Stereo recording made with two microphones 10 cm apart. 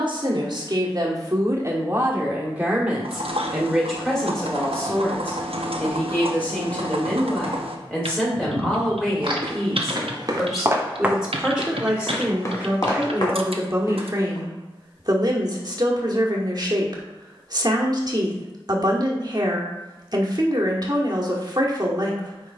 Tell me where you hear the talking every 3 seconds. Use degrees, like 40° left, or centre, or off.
30° right, centre, 10° left, centre, 20° right, 40° right, 40° right, 40° right.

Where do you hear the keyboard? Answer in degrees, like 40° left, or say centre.
80° right.